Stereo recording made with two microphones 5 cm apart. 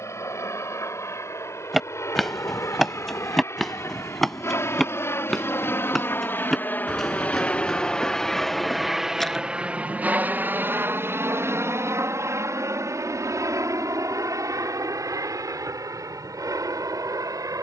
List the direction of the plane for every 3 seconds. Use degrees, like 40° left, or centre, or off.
70° left, 60° left, 20° left, 30° right, 60° right, 70° right.